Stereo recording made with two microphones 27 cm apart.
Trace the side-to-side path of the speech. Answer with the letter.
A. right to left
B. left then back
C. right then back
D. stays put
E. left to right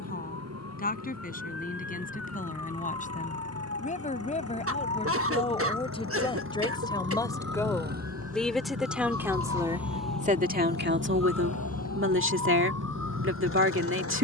E.